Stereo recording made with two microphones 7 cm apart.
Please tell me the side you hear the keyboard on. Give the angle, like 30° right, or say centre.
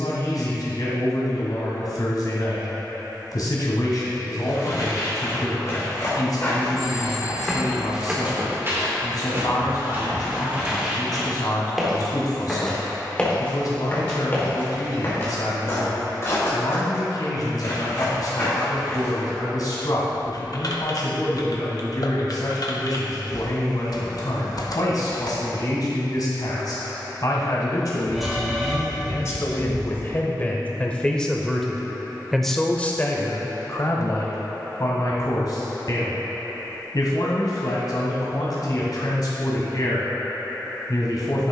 60° left.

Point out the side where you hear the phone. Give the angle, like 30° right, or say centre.
centre.